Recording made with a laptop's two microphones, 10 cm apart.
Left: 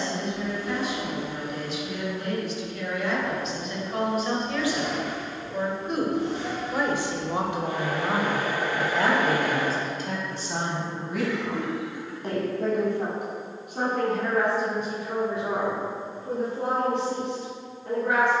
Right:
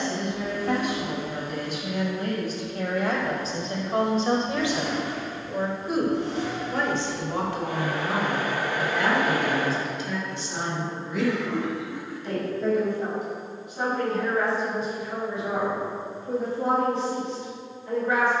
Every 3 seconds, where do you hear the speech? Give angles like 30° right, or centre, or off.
50° right, 30° right, 20° left, 40° left, 60° left, 60° left.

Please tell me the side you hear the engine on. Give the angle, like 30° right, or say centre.
70° right.